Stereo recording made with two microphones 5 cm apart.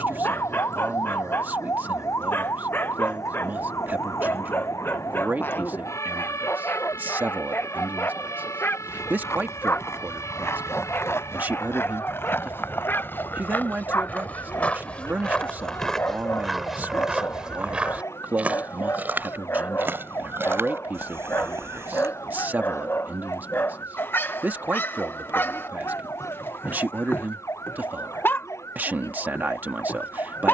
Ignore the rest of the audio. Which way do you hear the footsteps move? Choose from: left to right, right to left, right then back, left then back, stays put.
left to right.